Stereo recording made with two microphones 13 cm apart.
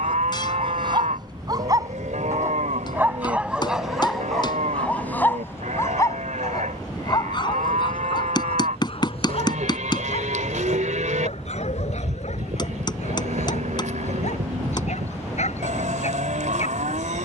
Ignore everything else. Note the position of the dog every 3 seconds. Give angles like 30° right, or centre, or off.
30° right, centre, 40° left, 60° left, 60° left, 60° left.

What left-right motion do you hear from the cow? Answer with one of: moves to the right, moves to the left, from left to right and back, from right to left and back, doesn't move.
doesn't move.